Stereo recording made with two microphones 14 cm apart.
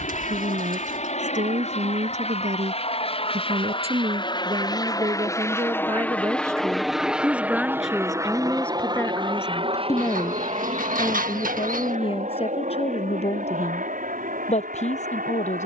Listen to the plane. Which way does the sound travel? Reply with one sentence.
In this clip you hear the plane travel towards the right.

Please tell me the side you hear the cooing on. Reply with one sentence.
You can hear the cooing on the right.